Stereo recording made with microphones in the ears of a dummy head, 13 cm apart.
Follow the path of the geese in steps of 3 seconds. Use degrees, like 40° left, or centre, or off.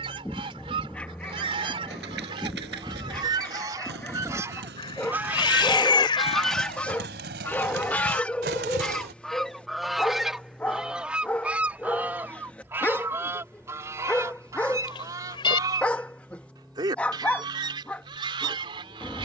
40° right, 20° right, 10° left, centre, 20° right, 30° right, 30° right.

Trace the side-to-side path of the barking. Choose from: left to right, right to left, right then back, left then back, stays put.
stays put.